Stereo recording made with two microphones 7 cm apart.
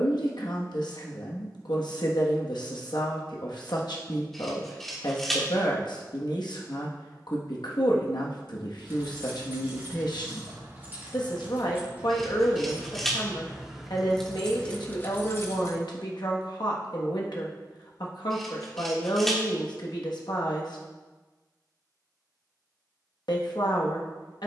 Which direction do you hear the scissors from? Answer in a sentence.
In this clip you hear the scissors in the centre.